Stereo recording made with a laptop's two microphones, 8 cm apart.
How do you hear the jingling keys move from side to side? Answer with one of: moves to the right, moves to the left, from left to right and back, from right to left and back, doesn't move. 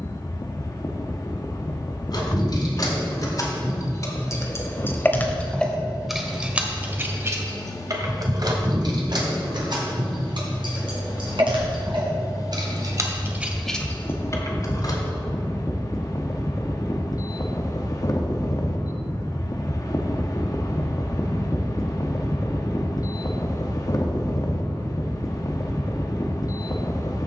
from left to right and back.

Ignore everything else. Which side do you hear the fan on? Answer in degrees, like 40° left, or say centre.
40° left.